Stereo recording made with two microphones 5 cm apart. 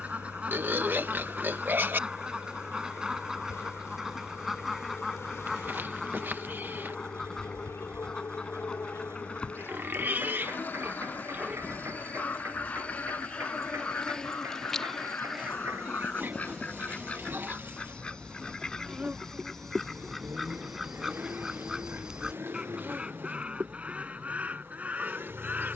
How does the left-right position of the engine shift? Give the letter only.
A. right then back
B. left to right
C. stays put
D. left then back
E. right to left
C.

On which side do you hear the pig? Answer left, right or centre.
right.